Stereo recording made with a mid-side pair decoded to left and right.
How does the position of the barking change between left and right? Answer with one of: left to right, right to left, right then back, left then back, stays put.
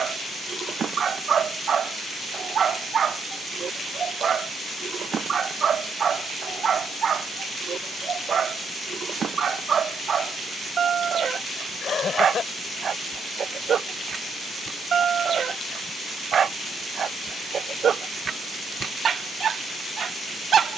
stays put.